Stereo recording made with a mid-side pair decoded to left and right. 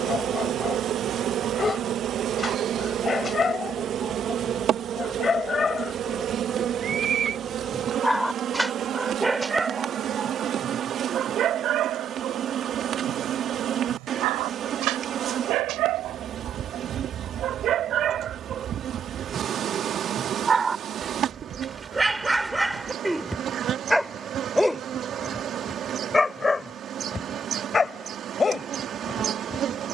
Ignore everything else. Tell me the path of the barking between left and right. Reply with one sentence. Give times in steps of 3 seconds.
You can hear the barking on the left from 0 s, in the centre from 6 s, on the right from 9 s, in the centre from 21 s and on the left from 27 s.